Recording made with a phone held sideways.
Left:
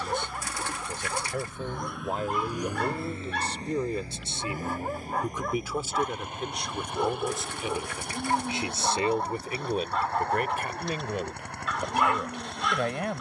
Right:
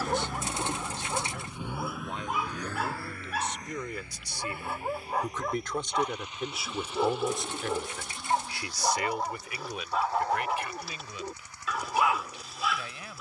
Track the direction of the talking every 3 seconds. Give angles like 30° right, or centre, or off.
50° left, 20° left, 10° left, 50° left, 60° left.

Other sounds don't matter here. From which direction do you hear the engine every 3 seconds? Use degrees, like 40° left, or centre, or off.
20° right, 40° left, 50° left, 60° left, 60° left.